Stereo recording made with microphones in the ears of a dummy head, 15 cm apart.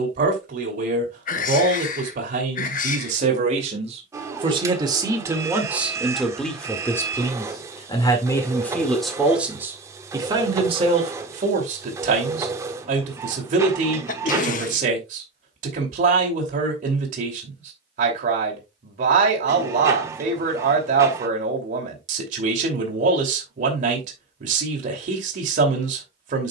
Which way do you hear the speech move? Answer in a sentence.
You can hear the speech move from right to left and back again.